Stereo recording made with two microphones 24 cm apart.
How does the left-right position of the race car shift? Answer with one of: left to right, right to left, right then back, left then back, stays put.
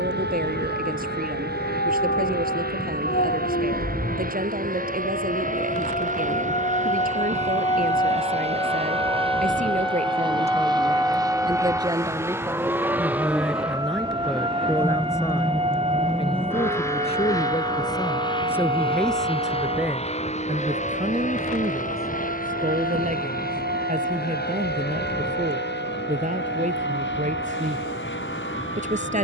right to left.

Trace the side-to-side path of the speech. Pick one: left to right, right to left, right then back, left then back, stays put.
left then back.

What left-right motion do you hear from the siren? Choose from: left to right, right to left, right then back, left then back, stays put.
left to right.